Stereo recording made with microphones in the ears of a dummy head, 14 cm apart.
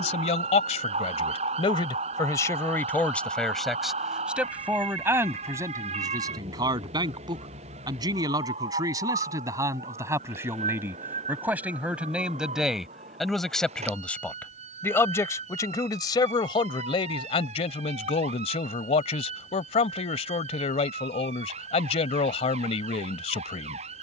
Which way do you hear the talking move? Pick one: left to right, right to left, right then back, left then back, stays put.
right then back.